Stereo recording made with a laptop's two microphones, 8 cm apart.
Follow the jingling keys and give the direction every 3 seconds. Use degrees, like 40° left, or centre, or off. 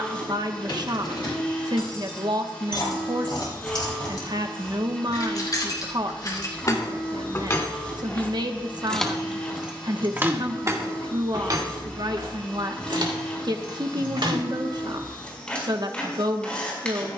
60° left, 60° left, 30° left, 30° right, 70° right, off.